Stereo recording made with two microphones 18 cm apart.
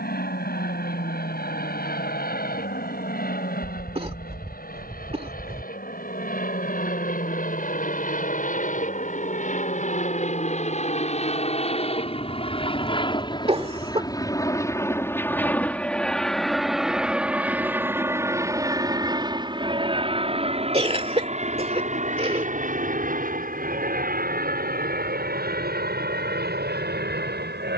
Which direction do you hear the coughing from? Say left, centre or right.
right.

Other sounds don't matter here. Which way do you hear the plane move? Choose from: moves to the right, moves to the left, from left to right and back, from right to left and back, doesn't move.
moves to the right.